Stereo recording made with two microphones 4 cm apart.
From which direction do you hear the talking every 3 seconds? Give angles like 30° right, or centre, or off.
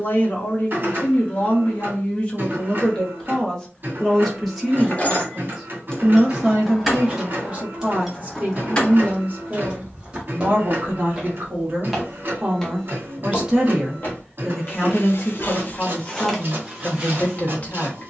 30° left, centre, 30° right, 40° right, 10° right, 30° left.